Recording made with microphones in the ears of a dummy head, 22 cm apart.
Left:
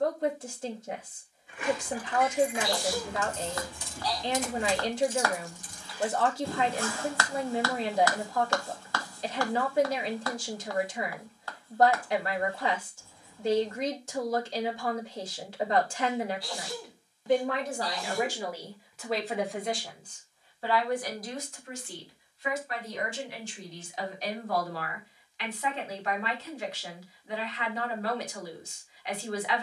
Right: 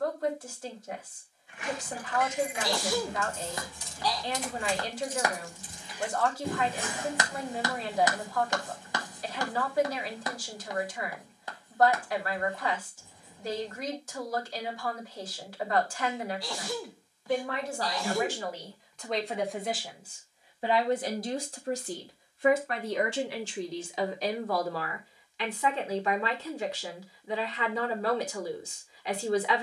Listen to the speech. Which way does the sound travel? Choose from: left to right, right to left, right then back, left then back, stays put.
left to right.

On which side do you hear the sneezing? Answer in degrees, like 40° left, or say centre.
60° right.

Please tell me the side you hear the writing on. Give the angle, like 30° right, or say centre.
20° right.